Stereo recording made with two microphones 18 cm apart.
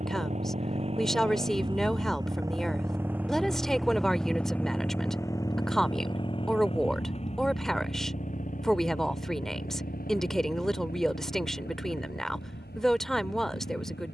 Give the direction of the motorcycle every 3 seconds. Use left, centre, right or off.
right, centre, left, left, left.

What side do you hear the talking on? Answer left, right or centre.
centre.